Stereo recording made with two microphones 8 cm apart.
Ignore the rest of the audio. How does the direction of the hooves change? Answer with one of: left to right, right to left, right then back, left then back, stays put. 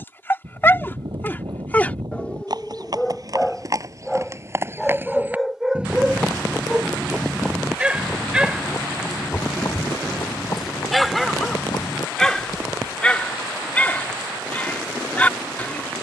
right to left.